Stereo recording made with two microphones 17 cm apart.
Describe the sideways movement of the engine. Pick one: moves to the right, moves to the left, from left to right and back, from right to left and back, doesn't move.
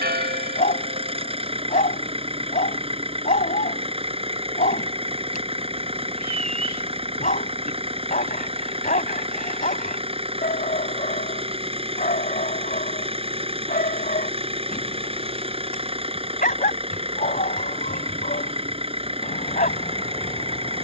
doesn't move.